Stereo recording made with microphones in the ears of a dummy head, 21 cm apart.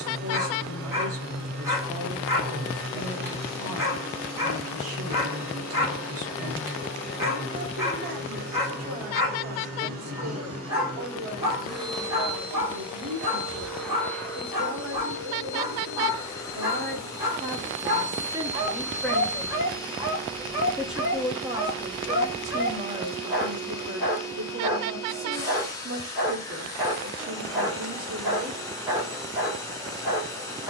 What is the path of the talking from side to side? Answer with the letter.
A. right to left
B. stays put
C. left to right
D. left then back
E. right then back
D.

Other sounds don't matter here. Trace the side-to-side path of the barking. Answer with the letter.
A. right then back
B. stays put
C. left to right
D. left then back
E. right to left
B.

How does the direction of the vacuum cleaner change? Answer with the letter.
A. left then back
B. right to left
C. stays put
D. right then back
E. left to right
B.